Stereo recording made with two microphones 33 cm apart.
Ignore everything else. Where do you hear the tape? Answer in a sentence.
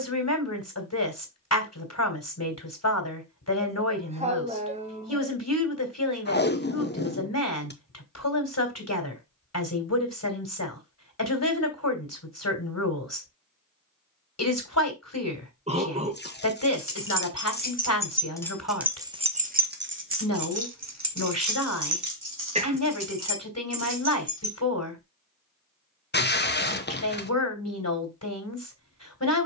In this clip you hear the tape on the left.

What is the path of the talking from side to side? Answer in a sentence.
You can hear the talking stay in one place.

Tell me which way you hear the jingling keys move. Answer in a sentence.
You can hear the jingling keys move to the right.